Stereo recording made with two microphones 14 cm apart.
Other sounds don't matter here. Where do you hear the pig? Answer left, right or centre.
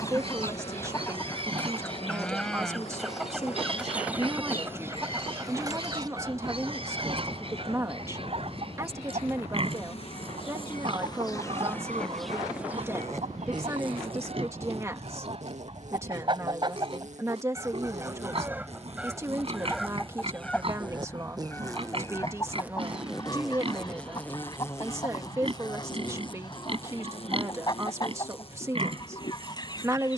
right.